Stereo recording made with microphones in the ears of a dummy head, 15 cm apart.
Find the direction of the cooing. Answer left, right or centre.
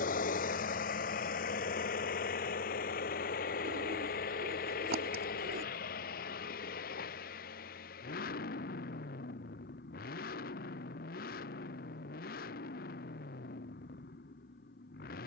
right.